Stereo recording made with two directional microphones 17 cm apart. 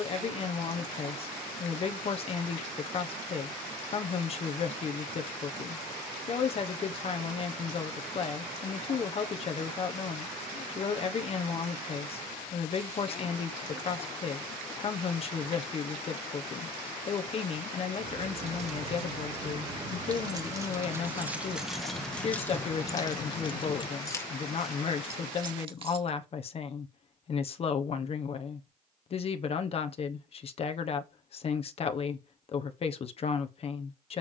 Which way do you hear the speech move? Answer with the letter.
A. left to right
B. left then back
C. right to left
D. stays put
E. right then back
D.